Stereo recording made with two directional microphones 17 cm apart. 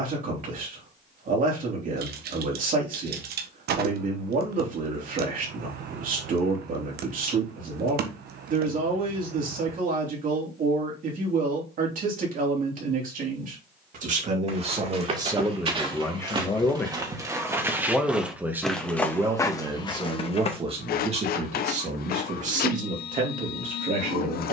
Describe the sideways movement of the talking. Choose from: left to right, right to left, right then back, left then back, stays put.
left then back.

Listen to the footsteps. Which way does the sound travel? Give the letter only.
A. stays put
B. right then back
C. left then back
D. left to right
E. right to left
E.